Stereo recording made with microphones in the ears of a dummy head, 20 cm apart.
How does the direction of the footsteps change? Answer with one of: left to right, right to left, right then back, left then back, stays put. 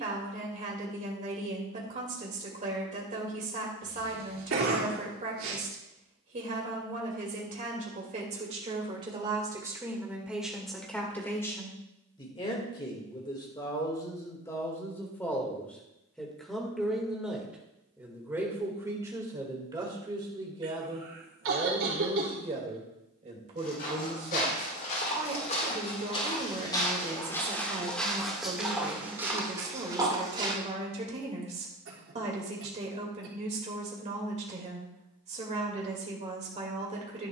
left to right.